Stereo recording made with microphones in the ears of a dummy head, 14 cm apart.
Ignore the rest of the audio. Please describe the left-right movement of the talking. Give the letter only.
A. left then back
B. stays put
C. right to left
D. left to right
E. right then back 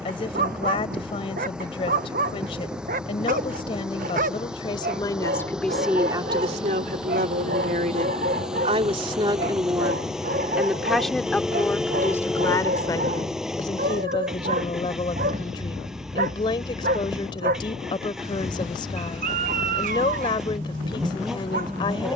E.